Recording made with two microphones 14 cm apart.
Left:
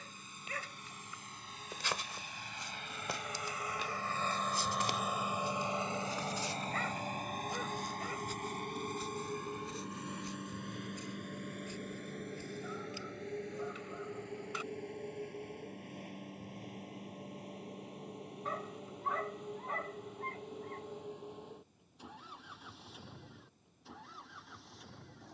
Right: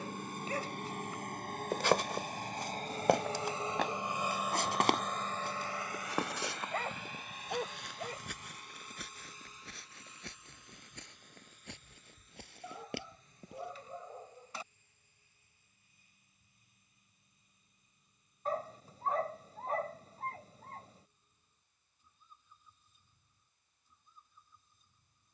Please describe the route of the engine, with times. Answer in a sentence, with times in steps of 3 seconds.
You can hear the engine on the right from 0 s, in the centre from 3 s and on the left from 6 s.